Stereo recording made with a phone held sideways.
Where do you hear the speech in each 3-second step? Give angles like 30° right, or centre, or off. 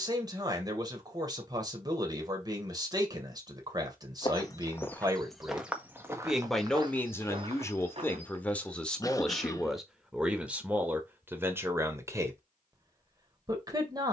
30° right, 30° right, 10° left, 10° right, 20° right.